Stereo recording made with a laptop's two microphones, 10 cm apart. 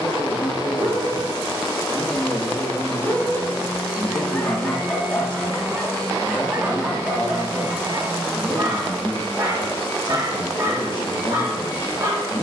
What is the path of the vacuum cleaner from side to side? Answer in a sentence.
In this clip you hear the vacuum cleaner go right and come back.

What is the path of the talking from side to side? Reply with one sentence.
In this clip you hear the talking stay put.